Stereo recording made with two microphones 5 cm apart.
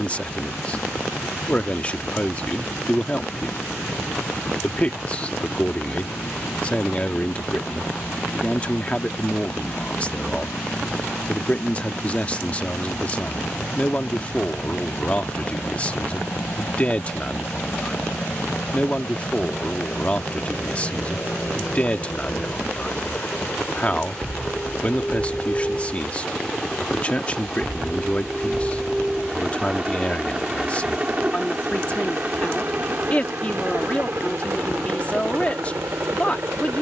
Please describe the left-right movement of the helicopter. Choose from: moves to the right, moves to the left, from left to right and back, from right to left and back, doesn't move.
moves to the right.